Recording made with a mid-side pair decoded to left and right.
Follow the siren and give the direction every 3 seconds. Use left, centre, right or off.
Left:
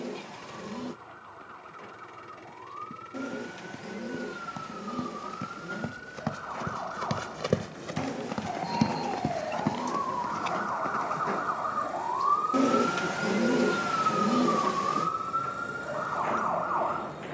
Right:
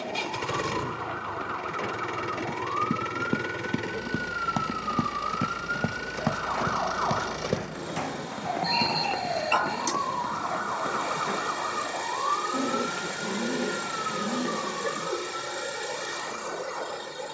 right, right, right, centre, left, left.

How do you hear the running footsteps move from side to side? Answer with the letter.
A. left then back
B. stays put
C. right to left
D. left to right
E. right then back
C.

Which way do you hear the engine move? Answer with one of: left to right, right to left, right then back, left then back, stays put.
stays put.